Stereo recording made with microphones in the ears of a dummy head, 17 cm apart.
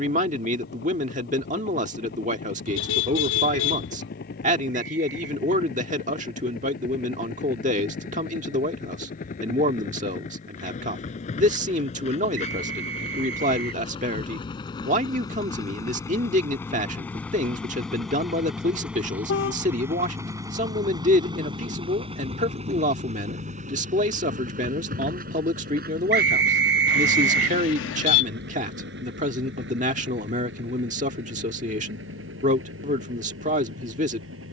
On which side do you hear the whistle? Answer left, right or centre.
right.